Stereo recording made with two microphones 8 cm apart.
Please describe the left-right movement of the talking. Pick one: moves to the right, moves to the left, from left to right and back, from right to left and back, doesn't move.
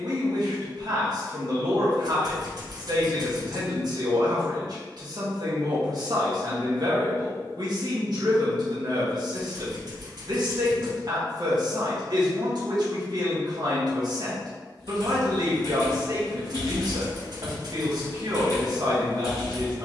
doesn't move.